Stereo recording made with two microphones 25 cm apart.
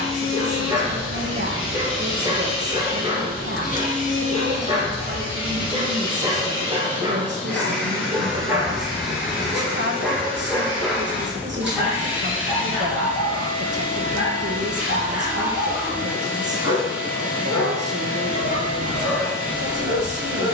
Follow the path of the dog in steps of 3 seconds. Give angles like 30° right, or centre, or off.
20° right, 20° right, 10° right, 10° left, 40° left, 60° left, 70° left.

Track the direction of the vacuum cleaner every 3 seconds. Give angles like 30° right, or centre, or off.
50° left, 30° left, 10° left, centre, 10° right, 10° right, 10° right.